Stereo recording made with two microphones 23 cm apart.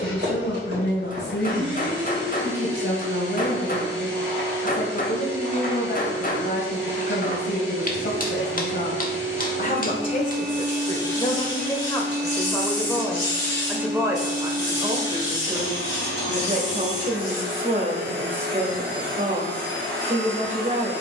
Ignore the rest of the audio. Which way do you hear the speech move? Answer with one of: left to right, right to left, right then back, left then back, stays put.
left to right.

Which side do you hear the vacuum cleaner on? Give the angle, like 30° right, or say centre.
50° right.